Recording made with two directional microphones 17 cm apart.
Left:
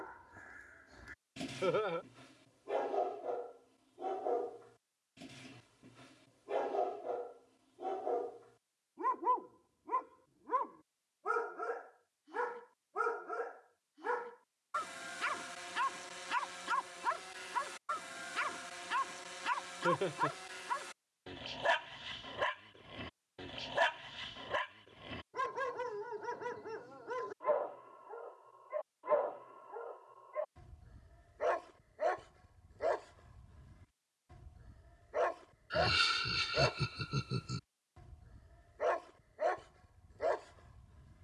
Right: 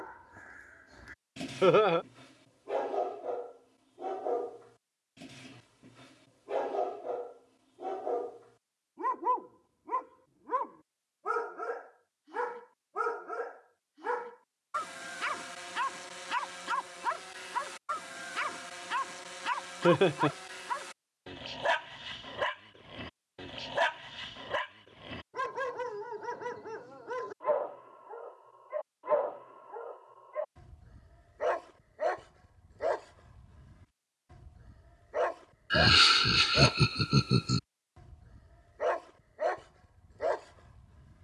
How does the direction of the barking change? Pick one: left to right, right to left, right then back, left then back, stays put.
stays put.